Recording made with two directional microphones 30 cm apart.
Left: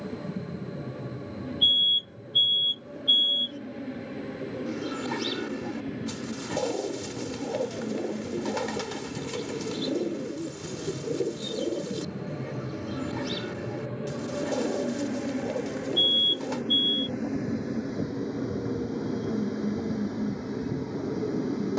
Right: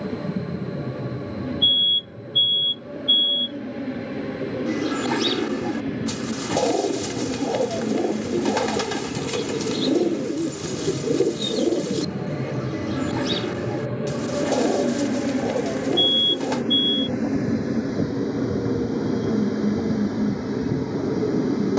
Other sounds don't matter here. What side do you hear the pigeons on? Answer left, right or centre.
right.